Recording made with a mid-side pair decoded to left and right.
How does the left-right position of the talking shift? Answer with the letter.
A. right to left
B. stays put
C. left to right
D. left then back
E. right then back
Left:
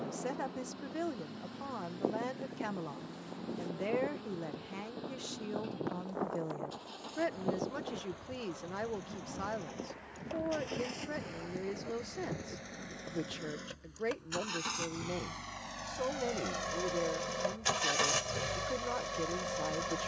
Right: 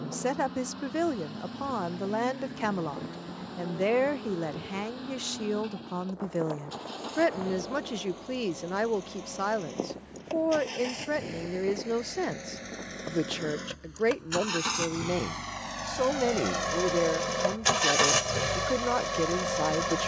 B.